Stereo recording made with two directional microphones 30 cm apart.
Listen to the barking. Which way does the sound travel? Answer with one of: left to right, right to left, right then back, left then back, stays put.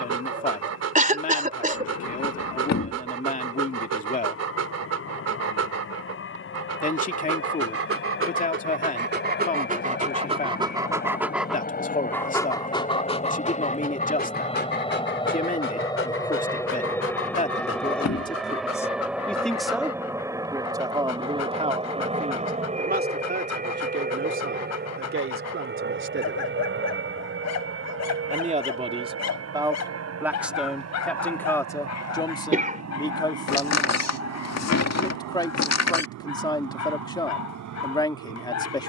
right to left.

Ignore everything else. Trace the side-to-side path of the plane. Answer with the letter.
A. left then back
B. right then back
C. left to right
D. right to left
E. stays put
C.